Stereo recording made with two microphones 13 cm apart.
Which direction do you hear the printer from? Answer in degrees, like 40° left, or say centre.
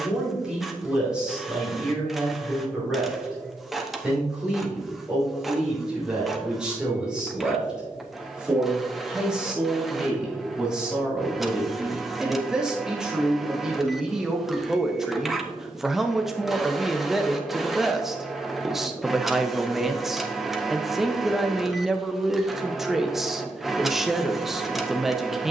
centre.